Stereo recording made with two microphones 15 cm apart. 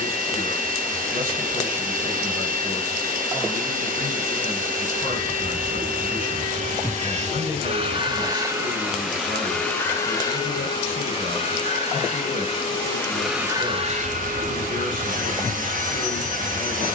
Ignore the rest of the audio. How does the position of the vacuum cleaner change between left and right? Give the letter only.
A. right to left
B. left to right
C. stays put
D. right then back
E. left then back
E.